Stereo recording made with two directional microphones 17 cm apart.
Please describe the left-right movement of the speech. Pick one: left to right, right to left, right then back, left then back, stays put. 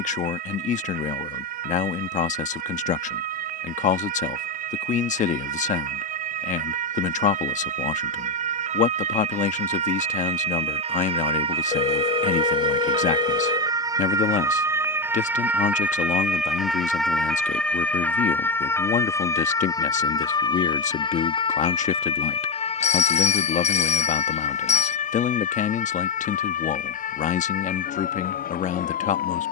stays put.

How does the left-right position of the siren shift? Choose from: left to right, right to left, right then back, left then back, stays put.
right to left.